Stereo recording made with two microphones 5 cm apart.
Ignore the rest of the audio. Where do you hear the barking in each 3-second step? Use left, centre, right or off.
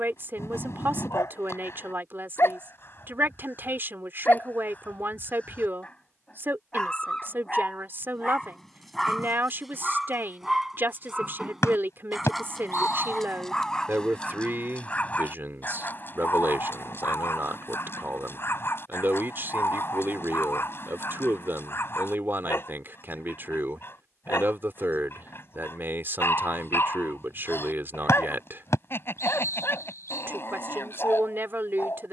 left, left, centre, centre, centre, left, left, left, left, left, left.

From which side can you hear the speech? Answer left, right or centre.
right.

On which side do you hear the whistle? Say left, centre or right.
left.